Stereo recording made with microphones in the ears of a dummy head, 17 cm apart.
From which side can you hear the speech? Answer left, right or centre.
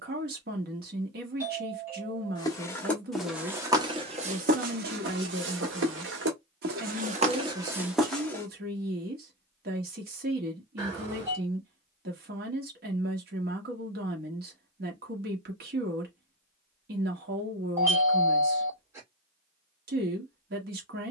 right.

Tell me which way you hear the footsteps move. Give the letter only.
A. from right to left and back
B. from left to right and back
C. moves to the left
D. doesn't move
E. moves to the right
B.